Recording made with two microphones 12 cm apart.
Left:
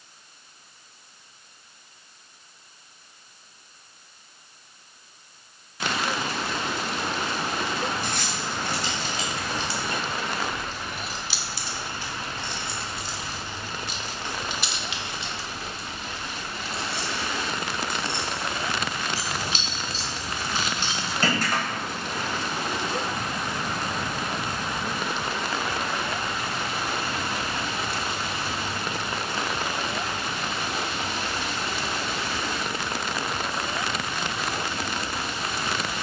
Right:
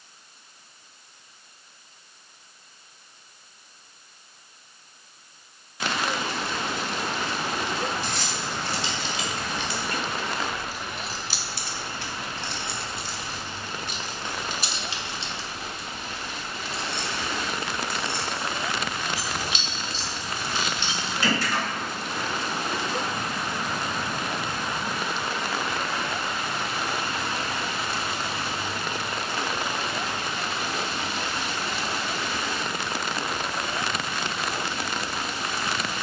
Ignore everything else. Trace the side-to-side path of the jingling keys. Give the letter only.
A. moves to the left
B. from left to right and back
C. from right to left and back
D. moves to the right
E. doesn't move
B.